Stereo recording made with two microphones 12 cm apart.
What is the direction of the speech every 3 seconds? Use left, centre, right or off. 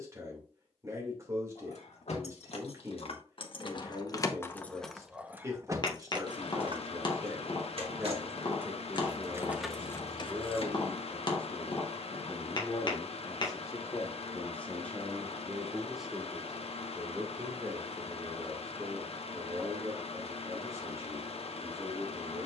right, right, right, centre, left, centre, right, right.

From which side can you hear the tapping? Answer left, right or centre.
left.